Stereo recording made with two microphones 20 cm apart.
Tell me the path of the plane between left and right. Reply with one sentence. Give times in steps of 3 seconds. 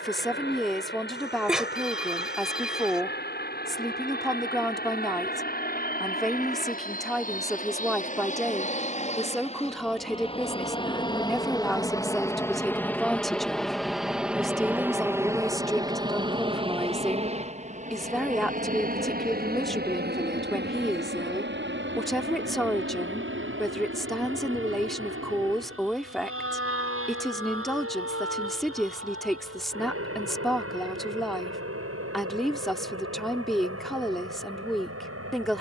In this clip you hear the plane on the left from 0 s, in the centre from 12 s and on the right from 15 s.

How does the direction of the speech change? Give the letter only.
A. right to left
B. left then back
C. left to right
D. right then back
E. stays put
E.